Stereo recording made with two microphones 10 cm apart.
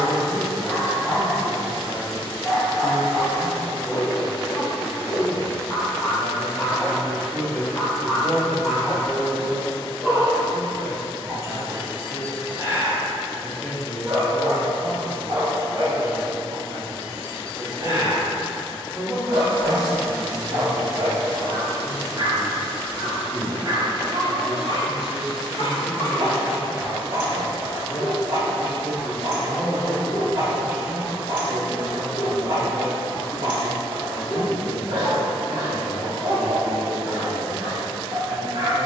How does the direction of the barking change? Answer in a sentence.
In this clip you hear the barking go from the left side to the right.